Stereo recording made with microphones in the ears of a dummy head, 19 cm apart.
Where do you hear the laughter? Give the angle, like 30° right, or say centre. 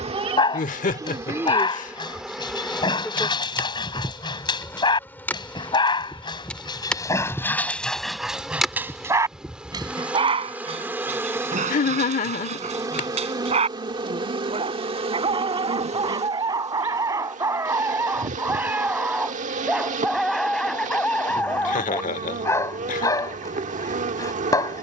40° left.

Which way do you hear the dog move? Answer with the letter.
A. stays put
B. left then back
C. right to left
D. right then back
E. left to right
D.